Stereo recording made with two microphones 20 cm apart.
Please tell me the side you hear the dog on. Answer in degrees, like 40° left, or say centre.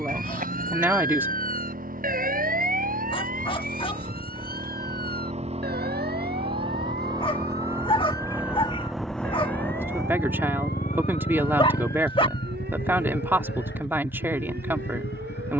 30° left.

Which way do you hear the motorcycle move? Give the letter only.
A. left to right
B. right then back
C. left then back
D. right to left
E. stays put
D.